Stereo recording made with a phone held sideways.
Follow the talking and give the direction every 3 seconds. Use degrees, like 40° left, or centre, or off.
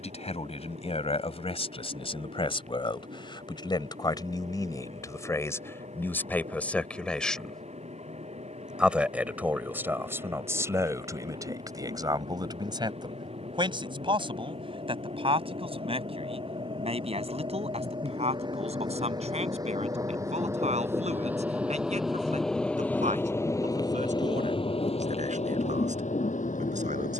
50° left, 30° left, 10° left, 20° right, 30° right, 50° right, 50° right, 60° right, 60° right.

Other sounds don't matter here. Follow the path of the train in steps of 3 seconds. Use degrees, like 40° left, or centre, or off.
60° right, 60° right, 60° right, 50° right, 50° right, 40° right, 30° right, centre, 50° left.